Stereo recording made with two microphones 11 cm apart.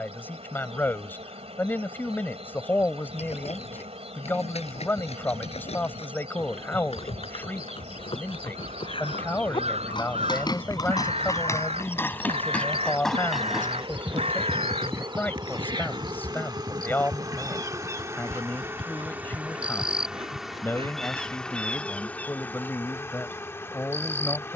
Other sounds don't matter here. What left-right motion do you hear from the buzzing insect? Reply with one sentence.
You can hear the buzzing insect move from right to left.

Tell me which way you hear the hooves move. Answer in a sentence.
You can hear the hooves travel towards the right.